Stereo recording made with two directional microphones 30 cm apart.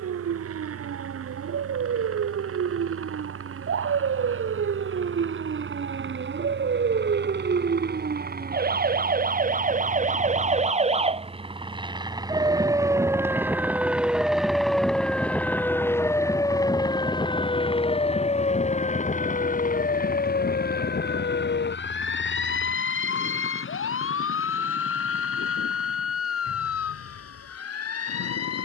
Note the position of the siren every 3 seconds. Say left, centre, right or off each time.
right, right, right, right, centre, centre, left, left, left, left.